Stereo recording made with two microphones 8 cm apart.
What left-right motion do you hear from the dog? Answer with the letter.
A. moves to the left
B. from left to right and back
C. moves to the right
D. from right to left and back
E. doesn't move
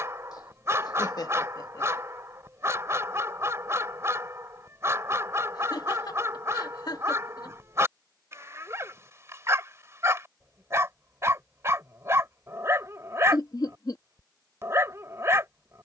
E.